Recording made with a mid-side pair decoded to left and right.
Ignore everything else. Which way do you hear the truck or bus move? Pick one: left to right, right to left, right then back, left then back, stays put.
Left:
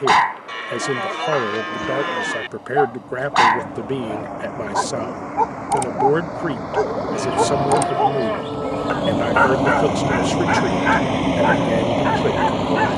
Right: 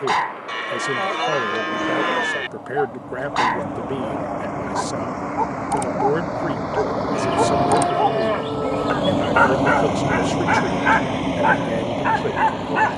right to left.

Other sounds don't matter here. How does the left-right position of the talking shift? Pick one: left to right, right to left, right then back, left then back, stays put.
stays put.